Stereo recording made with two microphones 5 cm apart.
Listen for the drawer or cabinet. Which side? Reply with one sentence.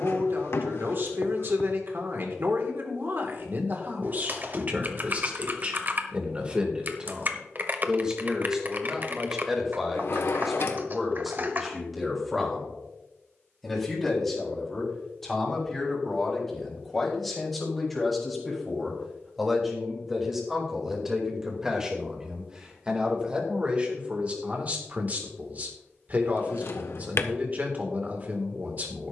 In this clip you hear the drawer or cabinet on the left.